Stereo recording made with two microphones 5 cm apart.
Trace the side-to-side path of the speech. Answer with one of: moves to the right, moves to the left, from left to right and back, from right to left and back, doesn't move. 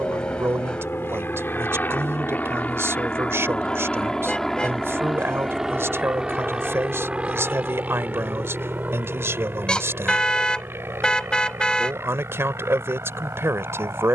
doesn't move.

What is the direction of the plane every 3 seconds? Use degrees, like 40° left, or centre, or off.
40° left, 10° left, 20° right, 40° right, 50° right.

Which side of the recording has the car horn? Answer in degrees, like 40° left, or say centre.
20° left.